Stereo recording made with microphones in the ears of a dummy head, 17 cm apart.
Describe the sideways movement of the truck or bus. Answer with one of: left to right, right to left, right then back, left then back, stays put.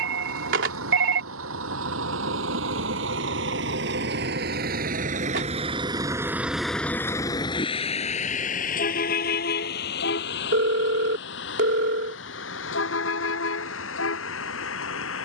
right to left.